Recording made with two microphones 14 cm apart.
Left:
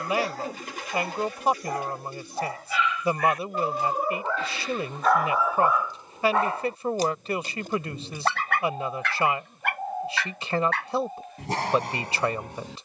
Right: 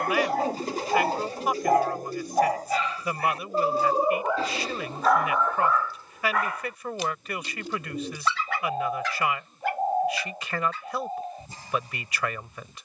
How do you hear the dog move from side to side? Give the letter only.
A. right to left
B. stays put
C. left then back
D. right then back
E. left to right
A.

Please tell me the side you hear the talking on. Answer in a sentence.
You can hear the talking on the left.